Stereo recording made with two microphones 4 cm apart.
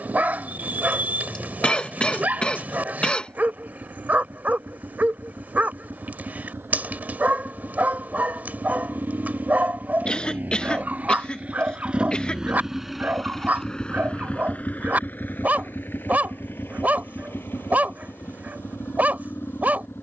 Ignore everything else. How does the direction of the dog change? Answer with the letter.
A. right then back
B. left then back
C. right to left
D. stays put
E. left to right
D.